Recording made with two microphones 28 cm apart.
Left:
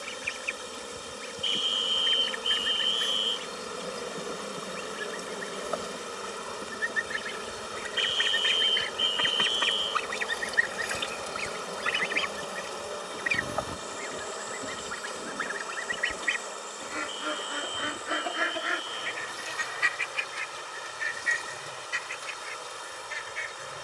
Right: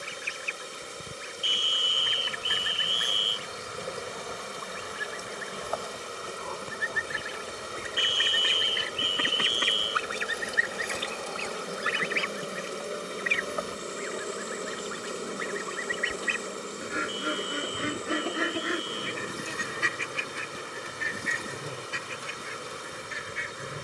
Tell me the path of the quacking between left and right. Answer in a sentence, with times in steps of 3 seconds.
You can hear the quacking on the right from 0 s, in the centre from 9 s, on the left from 12 s, in the centre from 15 s and on the right from 18 s.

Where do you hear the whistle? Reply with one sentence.
In this clip you hear the whistle on the right.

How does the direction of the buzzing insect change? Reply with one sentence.
In this clip you hear the buzzing insect go from the left side to the right.